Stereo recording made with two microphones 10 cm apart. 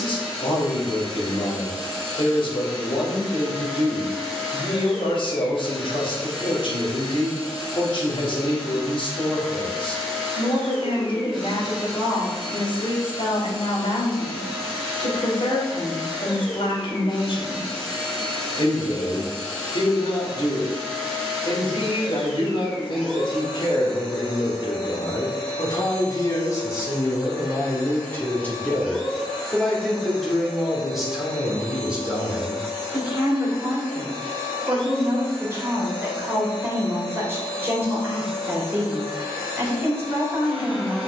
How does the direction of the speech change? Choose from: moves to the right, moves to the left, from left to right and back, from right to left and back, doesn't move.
moves to the right.